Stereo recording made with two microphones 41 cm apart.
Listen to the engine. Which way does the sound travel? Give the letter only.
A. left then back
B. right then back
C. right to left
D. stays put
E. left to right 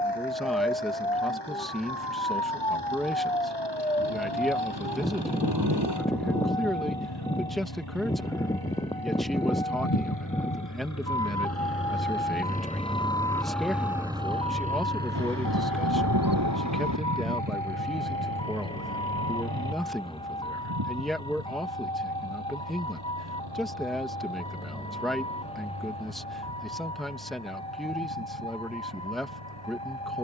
E.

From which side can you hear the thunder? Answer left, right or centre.
right.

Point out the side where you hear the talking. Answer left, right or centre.
centre.